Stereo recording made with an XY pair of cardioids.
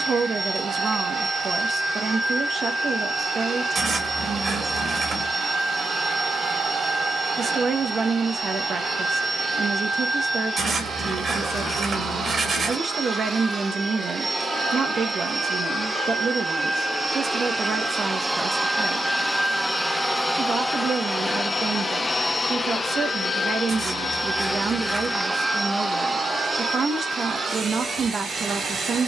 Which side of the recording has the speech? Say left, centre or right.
right.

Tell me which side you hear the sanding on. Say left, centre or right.
right.